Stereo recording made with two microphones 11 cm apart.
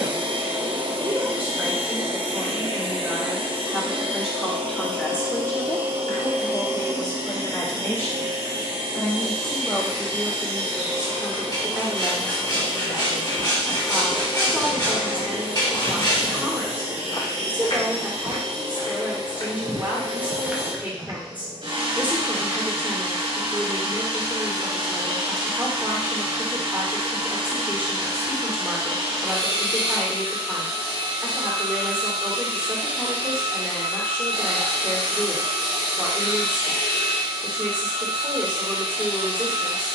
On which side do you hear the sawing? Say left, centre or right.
left.